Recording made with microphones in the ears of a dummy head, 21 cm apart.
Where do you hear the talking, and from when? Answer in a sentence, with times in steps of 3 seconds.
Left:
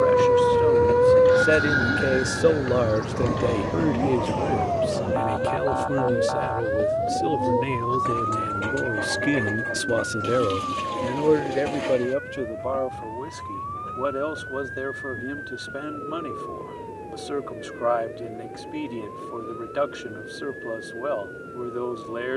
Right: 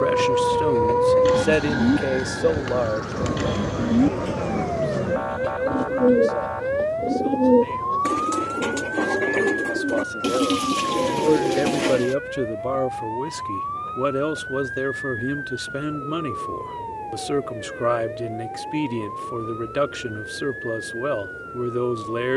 You can hear the talking in the centre from 0 s, on the left from 3 s and on the right from 12 s.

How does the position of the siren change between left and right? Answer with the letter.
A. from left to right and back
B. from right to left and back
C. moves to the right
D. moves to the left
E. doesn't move
C.